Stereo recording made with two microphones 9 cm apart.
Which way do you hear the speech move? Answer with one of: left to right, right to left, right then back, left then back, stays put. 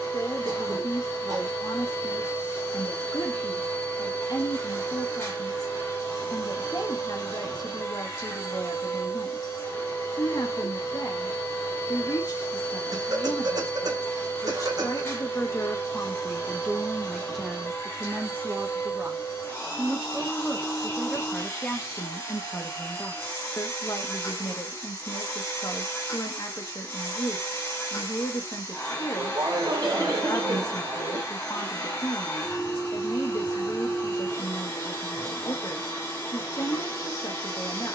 right then back.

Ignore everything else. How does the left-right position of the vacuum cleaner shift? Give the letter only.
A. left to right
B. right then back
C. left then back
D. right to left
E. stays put
E.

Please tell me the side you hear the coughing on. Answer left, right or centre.
right.